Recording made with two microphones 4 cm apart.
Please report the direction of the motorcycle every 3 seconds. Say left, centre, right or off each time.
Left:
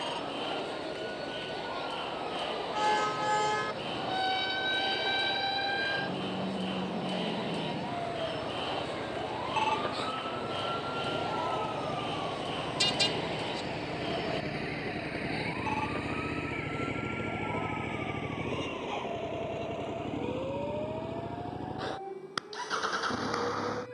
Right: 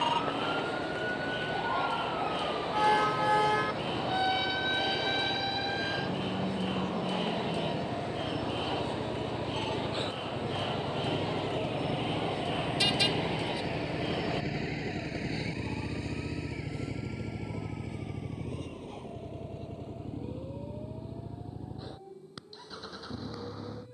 right, right, right, right, centre, left, left, left.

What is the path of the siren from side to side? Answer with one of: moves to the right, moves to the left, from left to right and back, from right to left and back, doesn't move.
moves to the left.